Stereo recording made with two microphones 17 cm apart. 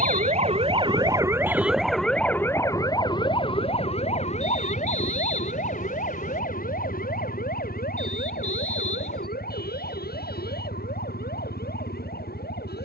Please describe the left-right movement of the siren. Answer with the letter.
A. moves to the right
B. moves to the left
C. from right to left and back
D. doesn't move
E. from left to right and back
B.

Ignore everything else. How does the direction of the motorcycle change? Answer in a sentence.
You can hear the motorcycle stay in one place.